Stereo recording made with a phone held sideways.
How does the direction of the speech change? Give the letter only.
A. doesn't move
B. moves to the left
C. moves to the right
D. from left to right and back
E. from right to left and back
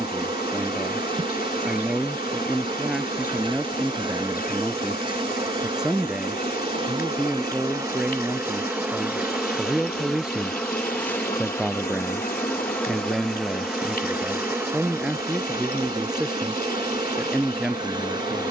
A.